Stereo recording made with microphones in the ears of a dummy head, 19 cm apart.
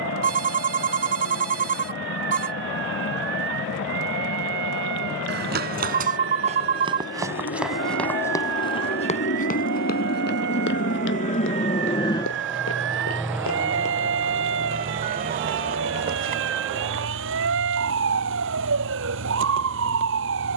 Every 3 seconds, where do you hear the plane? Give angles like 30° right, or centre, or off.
80° left, 70° left, 70° left, 50° left, 10° right, 60° right, 70° right.